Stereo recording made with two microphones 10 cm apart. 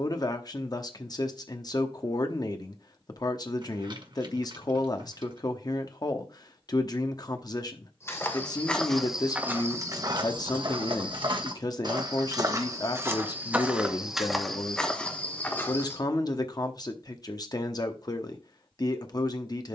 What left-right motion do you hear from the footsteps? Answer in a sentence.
In this clip you hear the footsteps move from left to right and back again.